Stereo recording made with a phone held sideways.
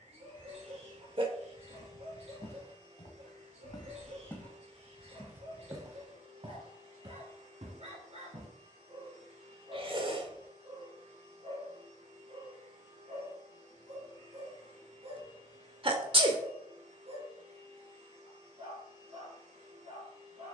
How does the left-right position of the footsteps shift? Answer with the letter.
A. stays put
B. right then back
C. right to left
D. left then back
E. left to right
E.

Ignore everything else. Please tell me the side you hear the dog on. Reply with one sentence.
You can hear the dog on the right.